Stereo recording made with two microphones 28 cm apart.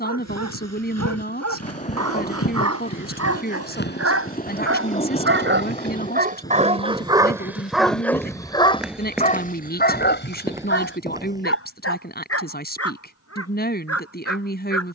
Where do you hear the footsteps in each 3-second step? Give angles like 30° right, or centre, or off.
60° left, 30° left, 10° left, 10° right, off.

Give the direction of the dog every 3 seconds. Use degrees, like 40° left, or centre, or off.
70° right, 50° right, 10° right, 40° left, 60° left.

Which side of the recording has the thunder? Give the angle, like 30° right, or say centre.
20° left.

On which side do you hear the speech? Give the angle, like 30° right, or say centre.
40° left.